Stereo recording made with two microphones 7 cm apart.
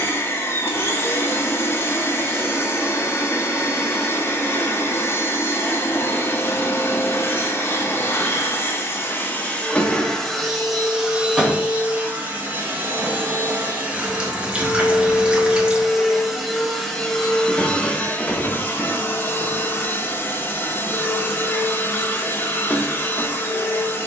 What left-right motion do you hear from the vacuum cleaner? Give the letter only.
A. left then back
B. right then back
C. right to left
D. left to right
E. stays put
B.